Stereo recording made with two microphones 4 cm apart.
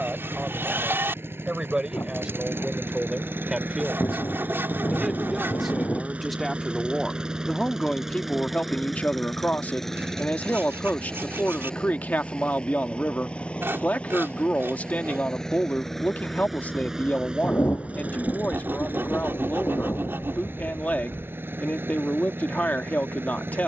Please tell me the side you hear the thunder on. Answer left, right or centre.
left.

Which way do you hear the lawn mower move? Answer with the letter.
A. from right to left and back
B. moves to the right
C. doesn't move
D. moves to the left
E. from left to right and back
A.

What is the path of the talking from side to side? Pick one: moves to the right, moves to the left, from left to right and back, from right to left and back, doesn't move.
moves to the left.